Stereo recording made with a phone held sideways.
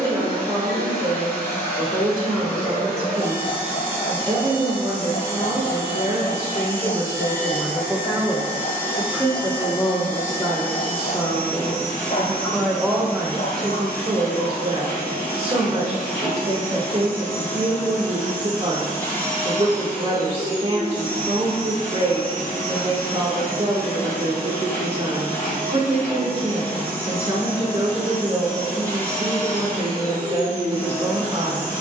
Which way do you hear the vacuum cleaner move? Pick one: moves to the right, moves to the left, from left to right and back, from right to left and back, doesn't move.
doesn't move.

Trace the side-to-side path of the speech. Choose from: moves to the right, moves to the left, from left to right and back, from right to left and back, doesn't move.
from right to left and back.